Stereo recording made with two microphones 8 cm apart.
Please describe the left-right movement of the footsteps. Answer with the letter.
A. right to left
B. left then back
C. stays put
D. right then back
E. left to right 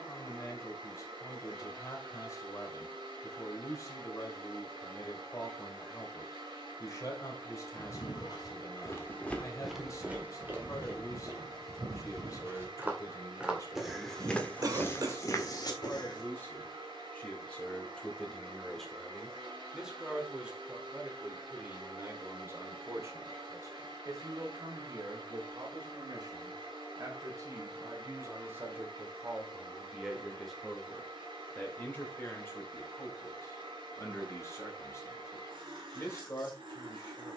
D.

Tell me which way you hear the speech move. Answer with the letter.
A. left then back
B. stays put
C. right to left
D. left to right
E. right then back
E.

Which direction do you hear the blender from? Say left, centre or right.
right.